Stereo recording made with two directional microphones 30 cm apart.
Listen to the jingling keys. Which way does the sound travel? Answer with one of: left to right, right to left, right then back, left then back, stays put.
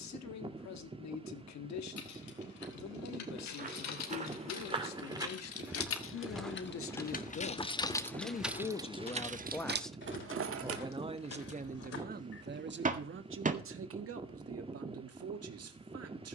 left to right.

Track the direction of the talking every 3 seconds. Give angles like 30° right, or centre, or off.
60° left, 60° left, 40° left, 10° right, 40° right, 50° right.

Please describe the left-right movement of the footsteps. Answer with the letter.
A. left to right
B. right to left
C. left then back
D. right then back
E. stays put
B.